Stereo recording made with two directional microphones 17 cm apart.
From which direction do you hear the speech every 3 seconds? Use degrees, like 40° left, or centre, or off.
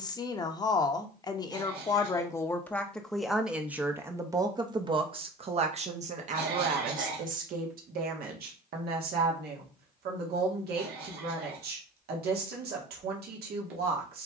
20° left, 20° right, 50° right, 70° right, 70° right.